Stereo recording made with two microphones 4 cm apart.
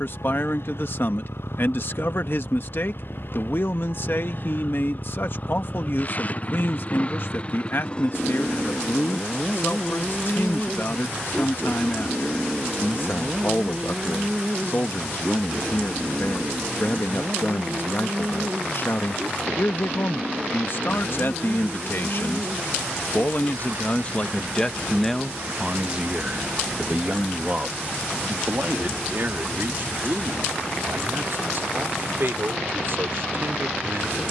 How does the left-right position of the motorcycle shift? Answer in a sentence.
You can hear the motorcycle travel towards the right.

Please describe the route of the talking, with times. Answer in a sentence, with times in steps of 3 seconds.
You can hear the talking on the left from 0 s, in the centre from 24 s and on the right from 27 s.